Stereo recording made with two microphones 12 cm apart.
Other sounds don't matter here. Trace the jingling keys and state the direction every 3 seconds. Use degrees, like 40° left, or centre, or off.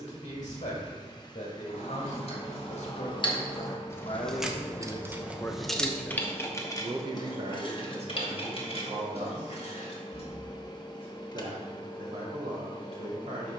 50° left, 10° left, 40° left, 50° left, off.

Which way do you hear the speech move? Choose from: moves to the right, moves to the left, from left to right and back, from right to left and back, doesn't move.
moves to the right.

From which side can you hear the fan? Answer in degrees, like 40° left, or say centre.
30° left.